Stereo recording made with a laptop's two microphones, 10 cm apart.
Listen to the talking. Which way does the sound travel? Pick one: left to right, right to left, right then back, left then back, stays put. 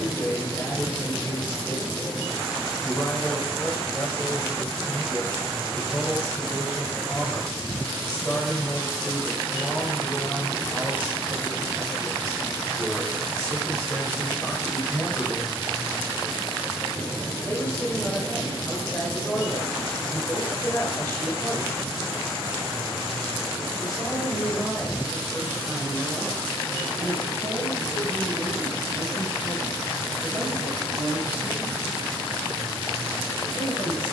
left to right.